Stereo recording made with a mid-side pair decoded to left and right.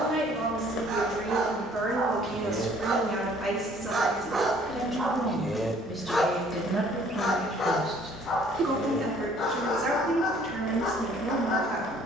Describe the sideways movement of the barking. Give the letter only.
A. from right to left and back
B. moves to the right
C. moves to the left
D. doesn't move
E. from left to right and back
C.